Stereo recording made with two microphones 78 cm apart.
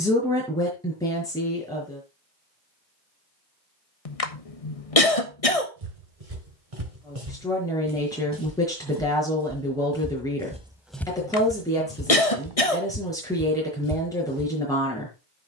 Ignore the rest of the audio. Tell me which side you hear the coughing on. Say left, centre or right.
left.